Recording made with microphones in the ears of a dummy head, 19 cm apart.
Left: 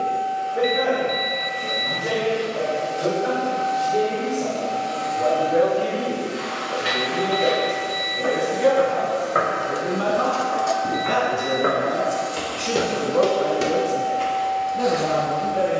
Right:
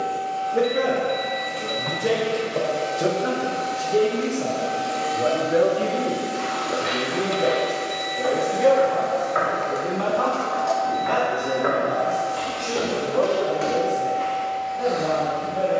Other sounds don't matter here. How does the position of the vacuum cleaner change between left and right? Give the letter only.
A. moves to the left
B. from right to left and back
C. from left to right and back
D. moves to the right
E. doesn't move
A.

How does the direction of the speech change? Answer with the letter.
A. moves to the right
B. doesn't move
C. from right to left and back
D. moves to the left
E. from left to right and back
D.